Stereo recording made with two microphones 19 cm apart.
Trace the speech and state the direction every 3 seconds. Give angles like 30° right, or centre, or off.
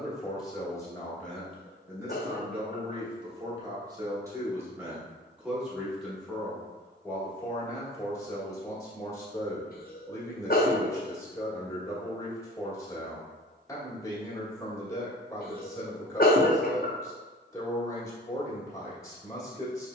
centre, 10° right, 10° left, 20° left, 20° left, 20° left, 20° left.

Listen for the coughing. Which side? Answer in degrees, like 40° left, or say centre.
50° left.